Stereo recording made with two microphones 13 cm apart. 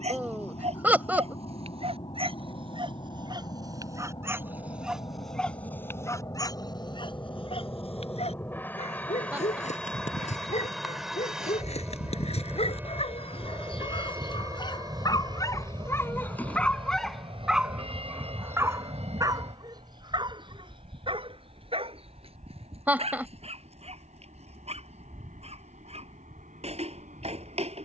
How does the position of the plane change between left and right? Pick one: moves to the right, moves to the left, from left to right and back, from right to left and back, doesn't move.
moves to the right.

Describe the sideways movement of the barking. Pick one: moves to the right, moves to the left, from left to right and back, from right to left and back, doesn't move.
from right to left and back.